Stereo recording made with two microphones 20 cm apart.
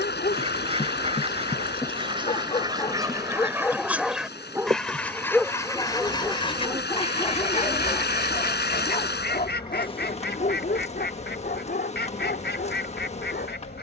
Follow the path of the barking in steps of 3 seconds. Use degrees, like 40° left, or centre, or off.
30° left, centre, 30° left, 50° left, 50° left.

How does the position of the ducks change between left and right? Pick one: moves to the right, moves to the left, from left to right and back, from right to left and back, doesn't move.
moves to the left.